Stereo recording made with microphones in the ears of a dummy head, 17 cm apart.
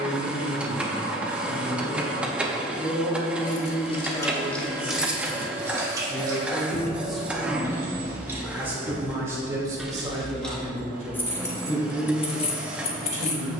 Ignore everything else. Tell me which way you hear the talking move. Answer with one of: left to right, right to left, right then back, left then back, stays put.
left to right.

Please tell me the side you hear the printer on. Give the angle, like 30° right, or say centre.
10° right.